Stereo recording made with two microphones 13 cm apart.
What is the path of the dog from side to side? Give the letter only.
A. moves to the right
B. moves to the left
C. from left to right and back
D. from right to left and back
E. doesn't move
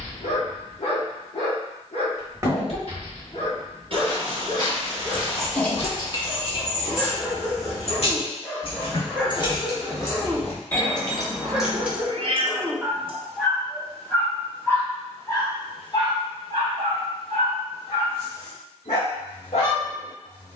C.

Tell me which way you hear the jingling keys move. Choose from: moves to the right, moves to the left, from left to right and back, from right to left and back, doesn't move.
from right to left and back.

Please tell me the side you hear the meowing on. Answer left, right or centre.
right.